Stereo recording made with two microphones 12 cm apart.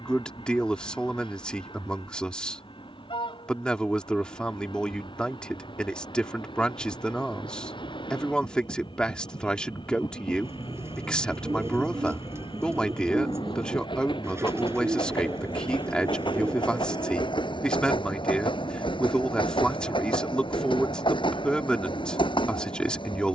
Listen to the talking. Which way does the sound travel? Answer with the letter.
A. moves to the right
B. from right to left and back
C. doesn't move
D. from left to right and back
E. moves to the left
C.